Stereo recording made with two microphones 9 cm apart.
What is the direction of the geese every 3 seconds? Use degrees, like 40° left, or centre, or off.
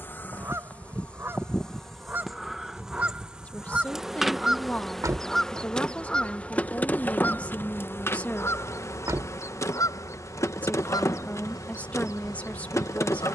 30° right, 10° right, 20° left, 50° left, 60° left.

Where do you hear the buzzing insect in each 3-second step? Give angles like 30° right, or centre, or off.
10° left, centre, 20° left, 30° left, 30° left.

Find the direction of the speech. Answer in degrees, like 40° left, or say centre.
20° left.